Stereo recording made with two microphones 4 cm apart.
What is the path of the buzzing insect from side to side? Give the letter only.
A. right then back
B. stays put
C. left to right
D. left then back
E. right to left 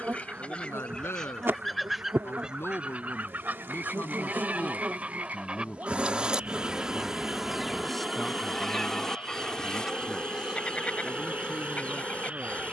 E.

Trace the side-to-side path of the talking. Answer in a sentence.
You can hear the talking travel towards the right.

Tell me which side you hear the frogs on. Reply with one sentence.
In this clip you hear the frogs on the right.